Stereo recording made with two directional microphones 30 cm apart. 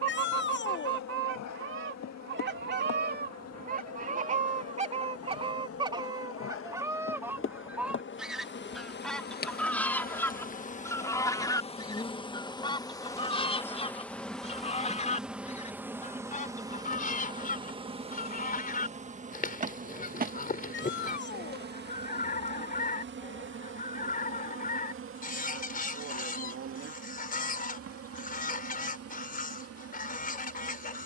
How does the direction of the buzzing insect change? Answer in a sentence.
You can hear the buzzing insect go from the left side to the right.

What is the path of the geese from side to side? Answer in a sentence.
In this clip you hear the geese go from the right side to the left.